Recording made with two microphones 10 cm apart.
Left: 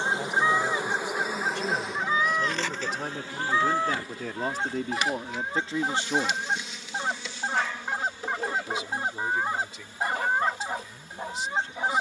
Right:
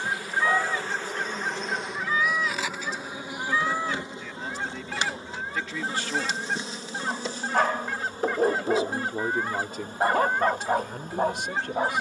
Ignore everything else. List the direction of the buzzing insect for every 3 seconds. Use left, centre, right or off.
centre, right, right, right.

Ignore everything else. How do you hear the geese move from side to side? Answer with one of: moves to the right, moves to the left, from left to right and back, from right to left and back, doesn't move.
doesn't move.